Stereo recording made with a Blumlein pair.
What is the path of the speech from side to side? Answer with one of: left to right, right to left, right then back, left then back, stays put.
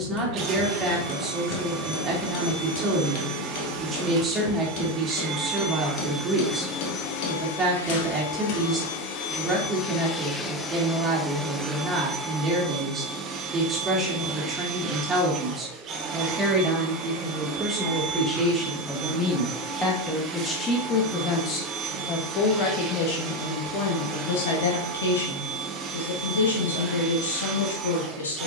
right to left.